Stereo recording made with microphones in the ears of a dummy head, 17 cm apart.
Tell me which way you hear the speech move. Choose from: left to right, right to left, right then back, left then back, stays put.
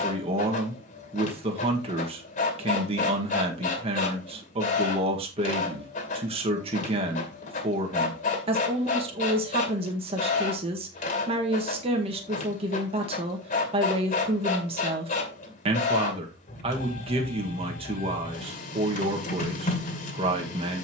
stays put.